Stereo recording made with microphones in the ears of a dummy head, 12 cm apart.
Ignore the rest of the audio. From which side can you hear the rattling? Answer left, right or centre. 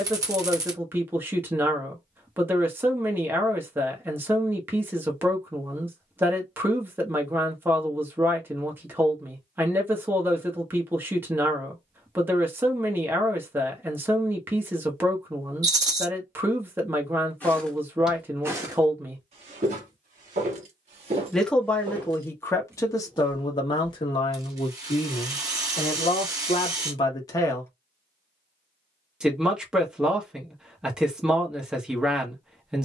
right.